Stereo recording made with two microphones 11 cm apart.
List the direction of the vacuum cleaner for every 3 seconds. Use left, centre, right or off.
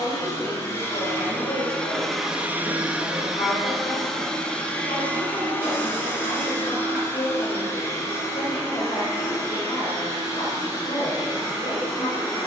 centre, centre, left, left.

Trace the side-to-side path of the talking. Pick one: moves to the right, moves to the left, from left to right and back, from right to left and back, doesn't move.
doesn't move.